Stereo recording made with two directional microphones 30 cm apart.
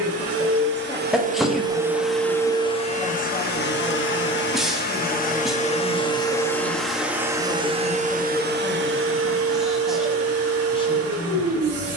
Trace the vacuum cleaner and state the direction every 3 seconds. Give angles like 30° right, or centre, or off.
20° right, 30° left, 10° right, 50° right.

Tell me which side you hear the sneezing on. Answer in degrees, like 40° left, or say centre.
centre.